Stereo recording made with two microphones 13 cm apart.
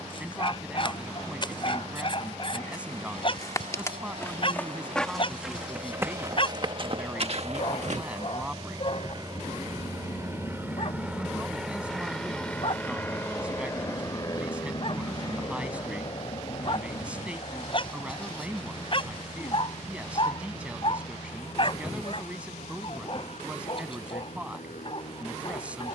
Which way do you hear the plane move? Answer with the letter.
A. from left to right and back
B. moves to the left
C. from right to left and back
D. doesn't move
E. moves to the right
B.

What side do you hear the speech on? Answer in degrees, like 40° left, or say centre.
10° right.